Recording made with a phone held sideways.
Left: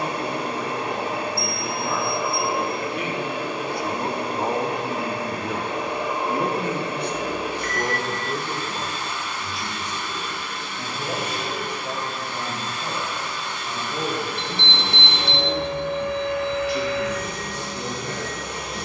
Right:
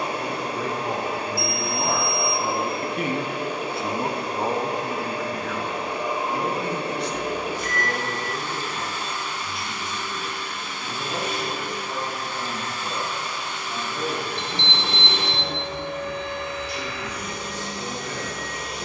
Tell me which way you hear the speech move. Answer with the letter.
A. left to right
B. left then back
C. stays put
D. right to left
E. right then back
D.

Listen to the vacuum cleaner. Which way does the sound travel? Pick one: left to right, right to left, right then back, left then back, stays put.
stays put.